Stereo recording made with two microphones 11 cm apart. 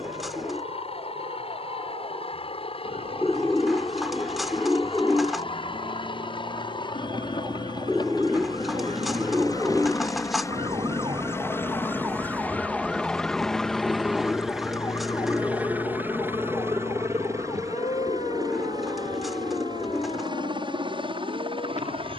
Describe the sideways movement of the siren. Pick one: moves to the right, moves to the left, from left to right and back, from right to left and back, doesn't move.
moves to the left.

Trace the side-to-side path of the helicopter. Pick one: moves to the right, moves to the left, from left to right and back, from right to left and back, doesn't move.
moves to the right.